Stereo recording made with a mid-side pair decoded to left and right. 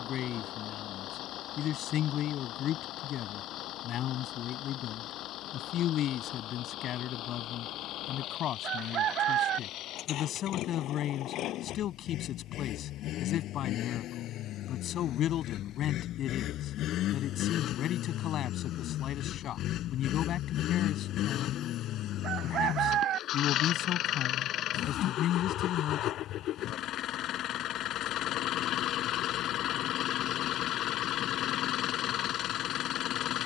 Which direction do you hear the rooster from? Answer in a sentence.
You can hear the rooster on the right.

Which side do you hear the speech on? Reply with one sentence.
In this clip you hear the speech on the left.